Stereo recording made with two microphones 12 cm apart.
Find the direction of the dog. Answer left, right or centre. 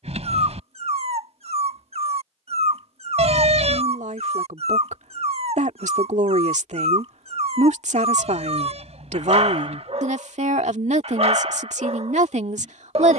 right.